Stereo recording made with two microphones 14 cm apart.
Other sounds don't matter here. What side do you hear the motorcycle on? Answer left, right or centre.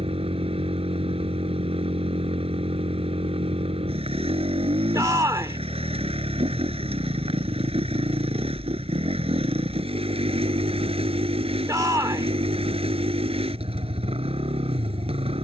right.